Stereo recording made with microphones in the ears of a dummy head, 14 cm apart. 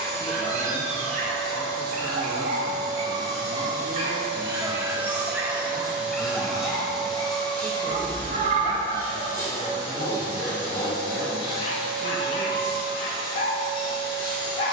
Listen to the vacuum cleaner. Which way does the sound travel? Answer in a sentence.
In this clip you hear the vacuum cleaner travel towards the left.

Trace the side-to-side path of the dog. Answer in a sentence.
You can hear the dog go from the right side to the left.